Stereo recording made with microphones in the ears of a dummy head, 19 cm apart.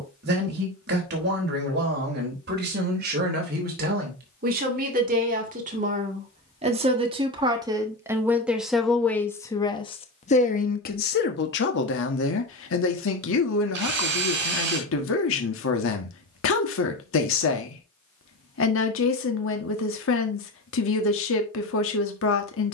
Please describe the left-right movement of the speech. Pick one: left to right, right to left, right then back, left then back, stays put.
right to left.